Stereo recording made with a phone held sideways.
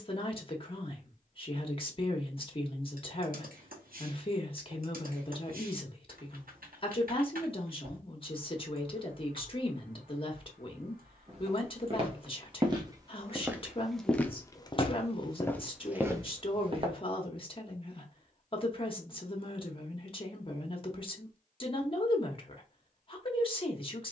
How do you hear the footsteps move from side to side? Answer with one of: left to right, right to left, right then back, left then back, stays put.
left then back.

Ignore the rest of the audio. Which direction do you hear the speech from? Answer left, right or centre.
left.